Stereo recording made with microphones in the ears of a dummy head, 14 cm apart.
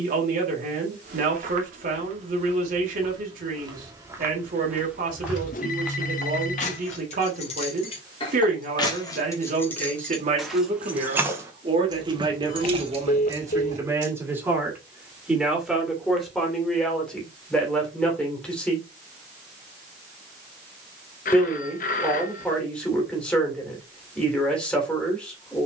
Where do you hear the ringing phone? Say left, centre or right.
left.